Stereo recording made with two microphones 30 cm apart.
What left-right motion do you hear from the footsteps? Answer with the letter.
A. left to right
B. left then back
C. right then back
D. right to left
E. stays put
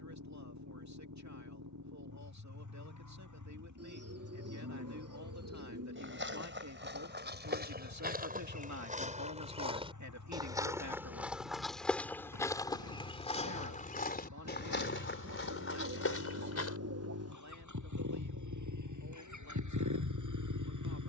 D.